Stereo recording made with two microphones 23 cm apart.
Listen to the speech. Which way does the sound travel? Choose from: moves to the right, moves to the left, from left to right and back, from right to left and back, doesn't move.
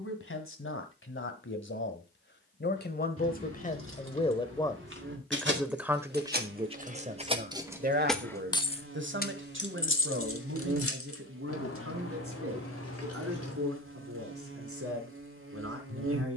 moves to the right.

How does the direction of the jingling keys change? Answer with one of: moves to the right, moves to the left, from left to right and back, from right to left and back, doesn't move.
moves to the left.